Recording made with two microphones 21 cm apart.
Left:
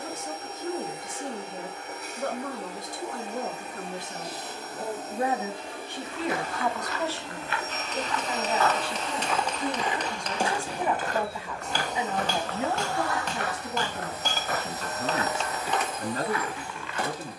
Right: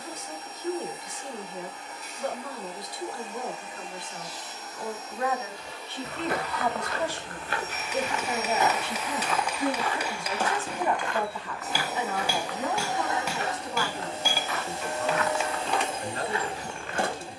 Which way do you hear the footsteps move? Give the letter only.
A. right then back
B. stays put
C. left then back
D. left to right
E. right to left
C.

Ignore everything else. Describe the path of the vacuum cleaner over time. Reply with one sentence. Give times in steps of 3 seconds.
You can hear the vacuum cleaner on the left from 0 s, in the centre from 9 s and on the right from 12 s.